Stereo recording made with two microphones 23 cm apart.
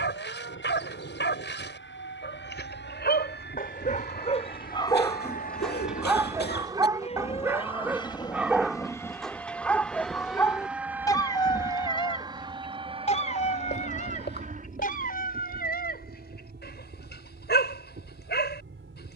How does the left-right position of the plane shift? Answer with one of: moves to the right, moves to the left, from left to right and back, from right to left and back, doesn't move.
moves to the right.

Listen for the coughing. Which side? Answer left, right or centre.
left.